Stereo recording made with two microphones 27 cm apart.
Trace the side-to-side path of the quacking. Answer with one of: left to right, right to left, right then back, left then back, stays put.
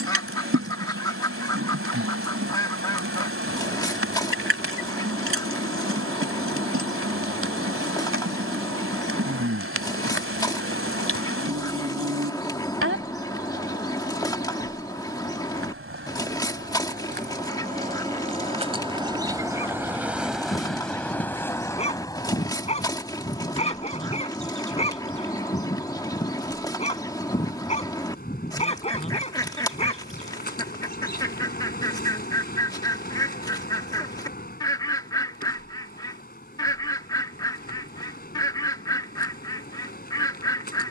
stays put.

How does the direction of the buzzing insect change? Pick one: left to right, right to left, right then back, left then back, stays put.
right to left.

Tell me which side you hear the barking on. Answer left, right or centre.
left.